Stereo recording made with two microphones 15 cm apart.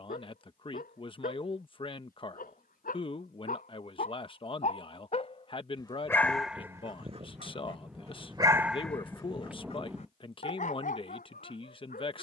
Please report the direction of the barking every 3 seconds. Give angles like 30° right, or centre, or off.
60° left, 50° left, 20° right, 50° left.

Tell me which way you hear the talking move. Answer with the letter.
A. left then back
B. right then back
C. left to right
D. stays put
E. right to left
D.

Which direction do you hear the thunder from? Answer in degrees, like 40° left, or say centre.
10° right.